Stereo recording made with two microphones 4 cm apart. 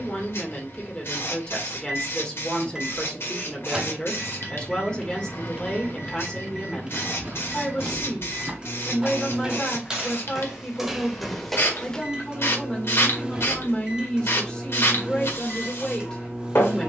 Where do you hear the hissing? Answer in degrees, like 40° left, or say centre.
70° left.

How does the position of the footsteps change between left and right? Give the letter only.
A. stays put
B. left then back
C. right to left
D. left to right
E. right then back
C.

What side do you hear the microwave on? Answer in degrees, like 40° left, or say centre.
20° right.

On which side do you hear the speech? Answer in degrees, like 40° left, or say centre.
20° left.